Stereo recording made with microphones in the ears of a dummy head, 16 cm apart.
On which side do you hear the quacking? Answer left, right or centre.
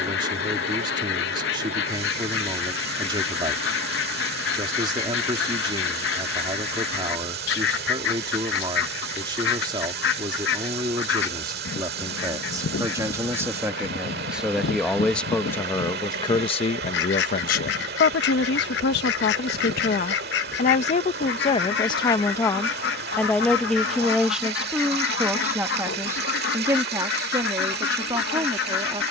left.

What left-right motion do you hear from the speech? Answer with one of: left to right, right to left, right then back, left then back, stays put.
left then back.